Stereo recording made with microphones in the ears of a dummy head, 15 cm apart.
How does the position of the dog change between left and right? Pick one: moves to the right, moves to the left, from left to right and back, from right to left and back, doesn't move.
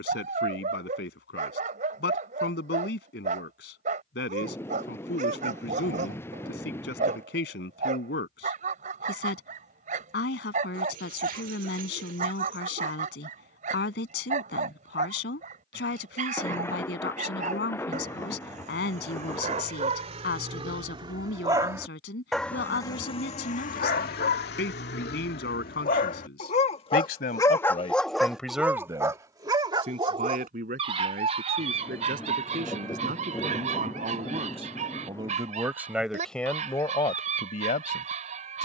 from right to left and back.